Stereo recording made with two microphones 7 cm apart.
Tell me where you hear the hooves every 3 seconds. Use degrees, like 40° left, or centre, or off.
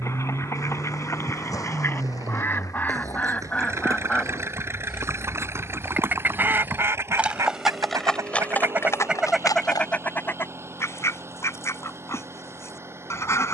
50° right, 40° right, centre, 50° left, off.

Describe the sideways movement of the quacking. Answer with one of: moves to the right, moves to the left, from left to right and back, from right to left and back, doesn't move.
from left to right and back.